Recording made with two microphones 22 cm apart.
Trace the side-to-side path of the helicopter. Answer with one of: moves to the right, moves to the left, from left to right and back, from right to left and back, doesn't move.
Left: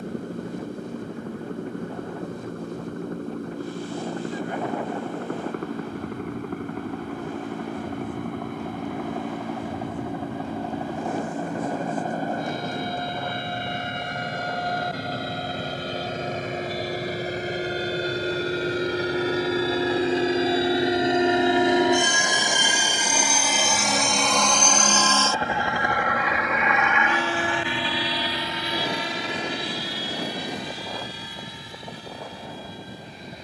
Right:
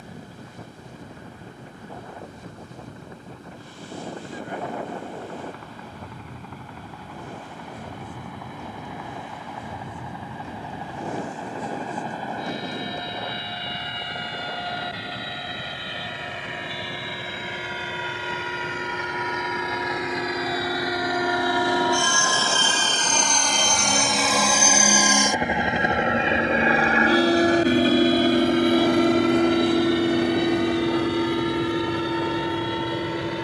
moves to the right.